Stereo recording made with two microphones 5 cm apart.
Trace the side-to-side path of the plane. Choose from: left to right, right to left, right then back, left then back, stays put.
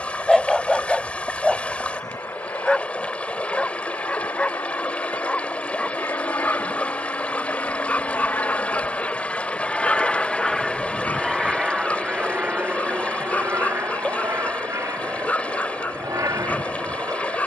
left to right.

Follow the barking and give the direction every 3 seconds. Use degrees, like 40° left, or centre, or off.
10° left, 20° left, 30° left, 30° left, 30° left, 30° left.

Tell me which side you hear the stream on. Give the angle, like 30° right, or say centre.
20° left.